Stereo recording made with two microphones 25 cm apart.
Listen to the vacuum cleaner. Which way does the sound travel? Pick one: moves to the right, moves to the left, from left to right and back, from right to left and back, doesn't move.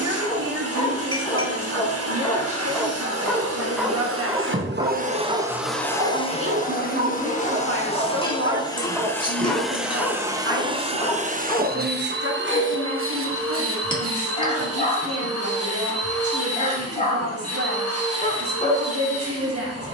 from right to left and back.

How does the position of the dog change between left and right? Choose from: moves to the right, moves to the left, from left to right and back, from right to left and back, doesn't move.
from left to right and back.